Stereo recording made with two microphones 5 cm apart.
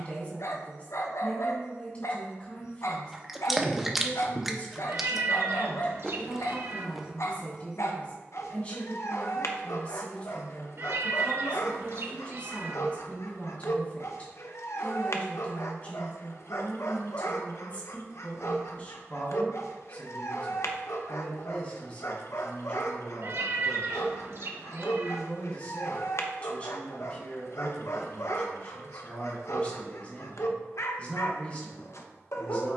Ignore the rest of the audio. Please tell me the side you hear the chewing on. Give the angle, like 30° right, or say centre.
10° right.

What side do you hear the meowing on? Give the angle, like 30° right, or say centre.
60° right.